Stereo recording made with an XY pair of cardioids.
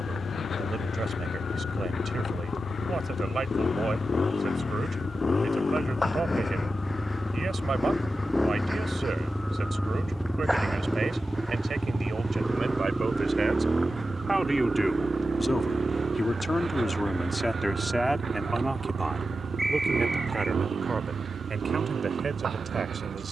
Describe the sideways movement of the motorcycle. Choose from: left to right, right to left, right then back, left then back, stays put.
left to right.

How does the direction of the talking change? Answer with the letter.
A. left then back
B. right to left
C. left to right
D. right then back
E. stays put
A.